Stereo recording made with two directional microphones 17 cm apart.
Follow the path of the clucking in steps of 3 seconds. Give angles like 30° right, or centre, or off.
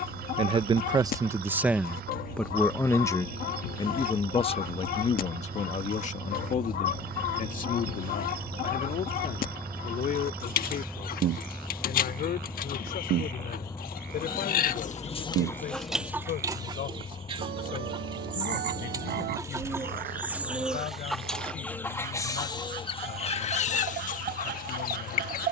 60° left, 60° left, 60° left, 60° left, 60° left, 10° right, 20° right, 20° left, 60° left.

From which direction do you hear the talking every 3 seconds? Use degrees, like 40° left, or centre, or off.
10° right, 30° left, 50° left, 60° left, 60° left, 60° left, 70° left, 70° left, 70° left.